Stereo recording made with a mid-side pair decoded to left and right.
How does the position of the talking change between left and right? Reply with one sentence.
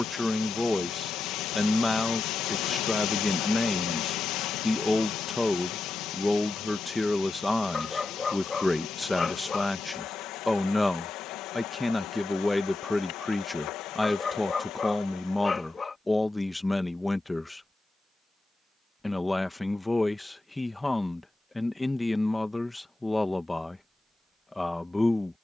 In this clip you hear the talking stay in one place.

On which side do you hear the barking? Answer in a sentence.
You can hear the barking on the left.